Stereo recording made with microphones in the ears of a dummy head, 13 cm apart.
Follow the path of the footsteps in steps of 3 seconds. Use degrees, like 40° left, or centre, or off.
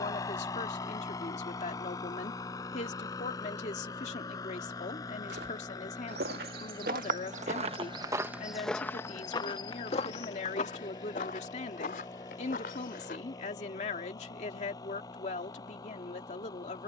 off, 80° right, 40° right, 40° left, 60° left, off.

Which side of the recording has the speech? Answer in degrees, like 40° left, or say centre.
50° left.